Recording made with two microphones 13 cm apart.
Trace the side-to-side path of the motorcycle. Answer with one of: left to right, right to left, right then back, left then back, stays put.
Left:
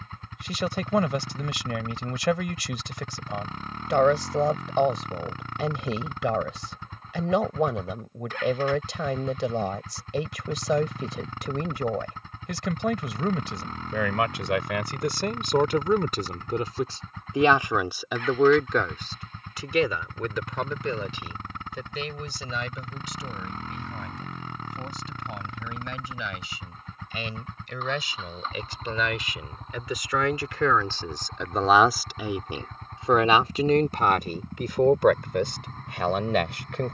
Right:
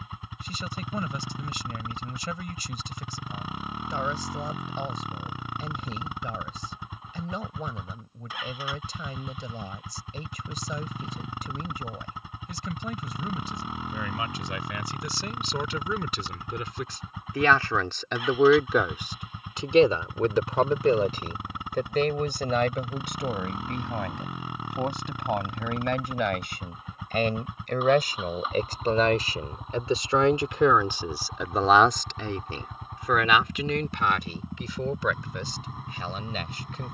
stays put.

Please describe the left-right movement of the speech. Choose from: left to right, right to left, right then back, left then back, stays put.
right then back.